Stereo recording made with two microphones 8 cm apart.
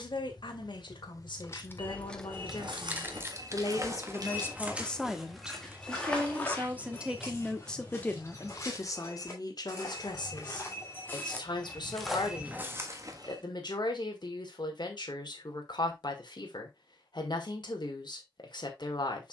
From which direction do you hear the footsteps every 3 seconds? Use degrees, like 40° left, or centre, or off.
60° right, 20° right, 30° left, 30° left, 30° right, off, off.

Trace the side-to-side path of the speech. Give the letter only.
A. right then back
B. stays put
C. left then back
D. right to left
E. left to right
A.